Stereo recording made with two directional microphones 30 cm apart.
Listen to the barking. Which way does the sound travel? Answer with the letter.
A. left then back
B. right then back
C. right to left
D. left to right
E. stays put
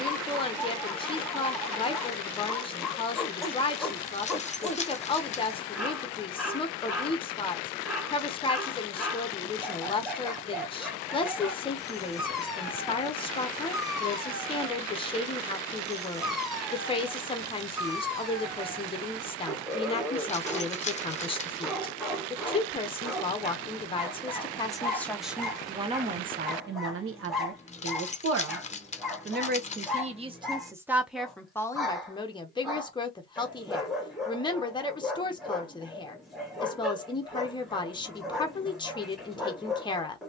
E.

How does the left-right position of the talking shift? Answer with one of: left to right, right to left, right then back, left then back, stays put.
right then back.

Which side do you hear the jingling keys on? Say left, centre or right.
left.